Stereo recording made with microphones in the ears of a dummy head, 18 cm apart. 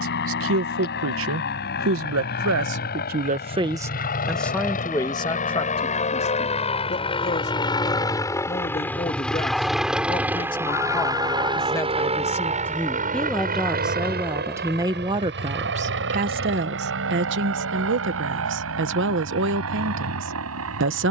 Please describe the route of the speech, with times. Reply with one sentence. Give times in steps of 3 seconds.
You can hear the speech on the right from 0 s, in the centre from 3 s, on the left from 6 s, in the centre from 12 s and on the right from 15 s.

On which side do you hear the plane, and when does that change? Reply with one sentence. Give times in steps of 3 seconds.
In this clip you hear the plane on the left from 0 s, in the centre from 9 s and on the right from 12 s.